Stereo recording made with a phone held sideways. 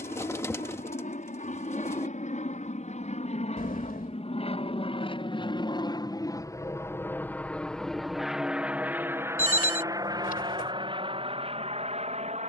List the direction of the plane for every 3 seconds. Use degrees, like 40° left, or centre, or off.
60° left, 40° left, 10° left, 30° right.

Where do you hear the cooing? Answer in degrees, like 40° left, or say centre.
20° left.